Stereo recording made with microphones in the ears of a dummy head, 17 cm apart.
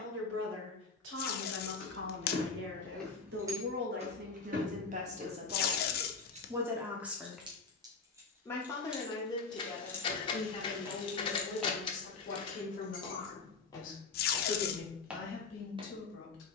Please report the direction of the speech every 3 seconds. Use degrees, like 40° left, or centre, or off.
70° right, 40° right, centre, 30° left, 40° left, 50° left.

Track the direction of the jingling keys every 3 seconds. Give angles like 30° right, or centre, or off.
30° left, 40° right, 20° right, 20° left, 50° left, off.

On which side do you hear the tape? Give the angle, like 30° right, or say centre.
50° left.